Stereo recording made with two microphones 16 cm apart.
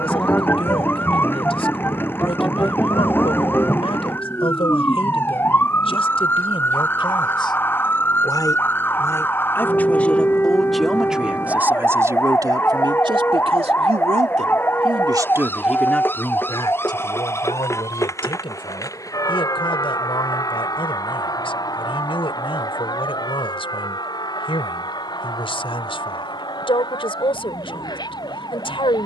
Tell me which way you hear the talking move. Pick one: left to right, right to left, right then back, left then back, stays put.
right then back.